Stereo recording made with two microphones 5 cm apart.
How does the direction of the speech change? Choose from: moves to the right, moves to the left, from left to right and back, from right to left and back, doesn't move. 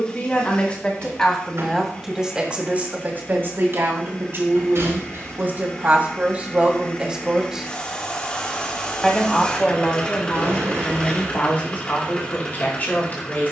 from left to right and back.